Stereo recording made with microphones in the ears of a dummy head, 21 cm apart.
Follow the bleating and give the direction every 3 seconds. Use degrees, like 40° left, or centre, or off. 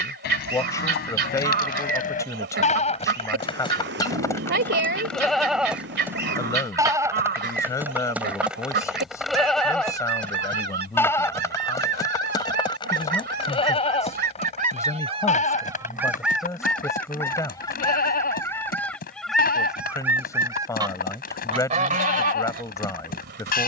40° left, 10° left, 10° right, 10° left, 20° left, 40° left, 40° left, 40° left.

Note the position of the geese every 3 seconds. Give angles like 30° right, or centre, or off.
50° right, 50° right, 50° right, 50° right, 40° right, centre, centre, 40° right.